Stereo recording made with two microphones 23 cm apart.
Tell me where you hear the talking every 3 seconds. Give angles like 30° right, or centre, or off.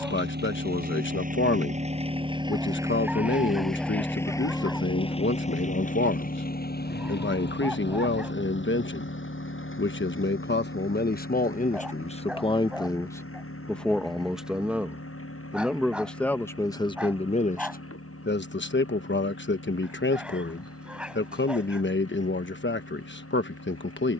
60° left, 60° left, 60° left, 50° left, 10° left, 20° left, 50° left, 50° left.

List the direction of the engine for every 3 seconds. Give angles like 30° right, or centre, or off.
30° right, 10° left, 50° left, 60° left, 70° left, 70° left, 80° left, 80° left.